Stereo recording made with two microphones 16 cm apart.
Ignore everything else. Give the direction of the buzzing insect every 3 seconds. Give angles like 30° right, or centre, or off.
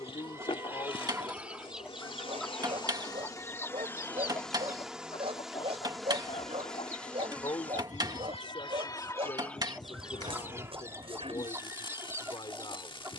30° left, 10° left, 10° left, 20° left, 30° left.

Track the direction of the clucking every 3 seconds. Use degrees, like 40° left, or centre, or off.
10° right, 20° left, 40° left, 10° right, 20° right.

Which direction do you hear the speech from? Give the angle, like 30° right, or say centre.
30° left.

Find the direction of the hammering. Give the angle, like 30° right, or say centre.
30° right.